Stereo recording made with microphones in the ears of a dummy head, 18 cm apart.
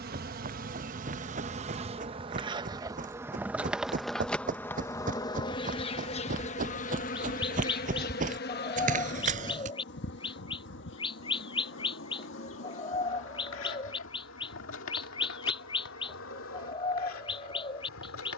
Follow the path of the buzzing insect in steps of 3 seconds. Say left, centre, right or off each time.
right, centre, left, left, left, left.